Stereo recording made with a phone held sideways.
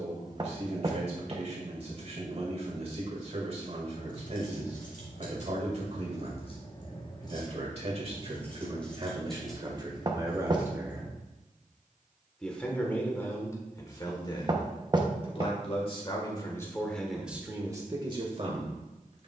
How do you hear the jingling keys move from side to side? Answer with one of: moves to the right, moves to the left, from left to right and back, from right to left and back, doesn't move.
moves to the right.